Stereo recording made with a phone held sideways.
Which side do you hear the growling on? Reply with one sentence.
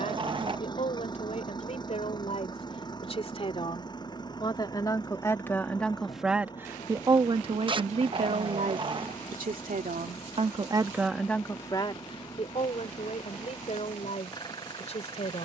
In this clip you hear the growling on the right.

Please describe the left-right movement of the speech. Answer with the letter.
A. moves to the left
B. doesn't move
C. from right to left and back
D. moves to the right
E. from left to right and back
E.